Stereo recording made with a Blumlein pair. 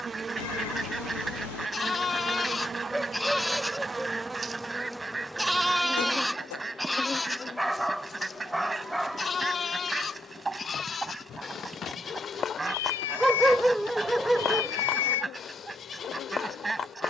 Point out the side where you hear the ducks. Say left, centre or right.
centre.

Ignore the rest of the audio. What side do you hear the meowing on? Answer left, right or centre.
left.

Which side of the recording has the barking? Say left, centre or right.
centre.